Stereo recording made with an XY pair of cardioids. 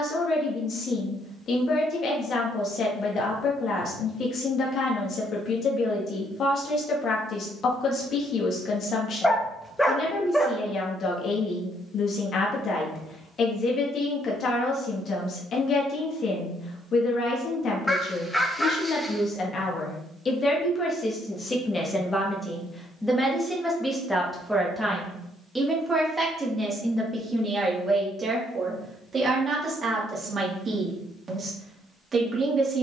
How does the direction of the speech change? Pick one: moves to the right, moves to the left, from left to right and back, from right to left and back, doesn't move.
moves to the right.